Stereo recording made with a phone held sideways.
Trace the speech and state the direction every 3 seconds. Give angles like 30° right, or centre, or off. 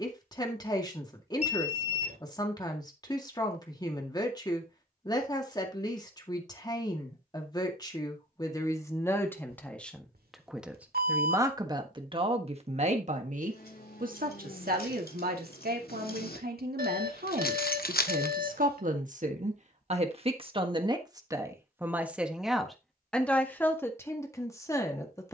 30° left, 30° left, 20° left, centre, 50° right, 70° right, 50° right, centre, 20° left.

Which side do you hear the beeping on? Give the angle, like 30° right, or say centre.
70° right.